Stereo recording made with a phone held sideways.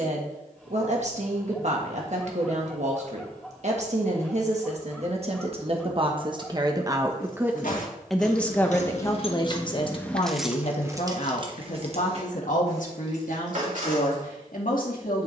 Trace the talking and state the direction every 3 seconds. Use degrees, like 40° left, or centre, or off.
50° right, 50° right, 10° right, 40° left, 70° left.